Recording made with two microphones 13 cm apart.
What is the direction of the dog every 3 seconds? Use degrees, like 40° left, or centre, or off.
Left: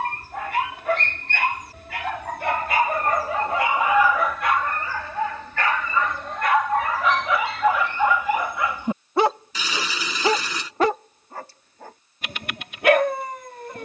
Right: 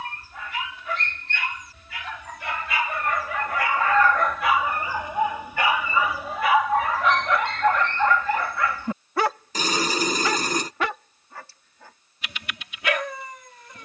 60° left, centre, 10° left, 30° left, 50° left.